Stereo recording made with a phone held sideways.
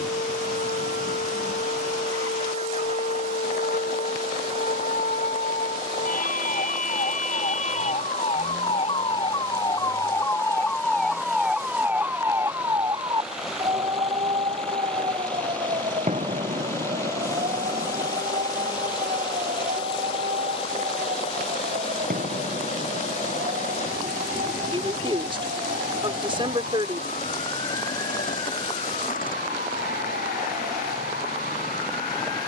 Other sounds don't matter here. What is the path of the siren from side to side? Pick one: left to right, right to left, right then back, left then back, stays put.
left to right.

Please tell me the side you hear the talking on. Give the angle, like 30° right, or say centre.
30° right.